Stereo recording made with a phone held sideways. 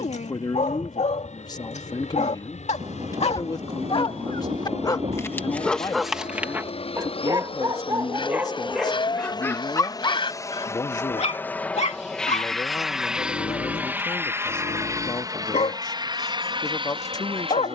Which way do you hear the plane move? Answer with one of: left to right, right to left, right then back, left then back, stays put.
left to right.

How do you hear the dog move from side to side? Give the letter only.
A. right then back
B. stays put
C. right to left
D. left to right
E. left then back
A.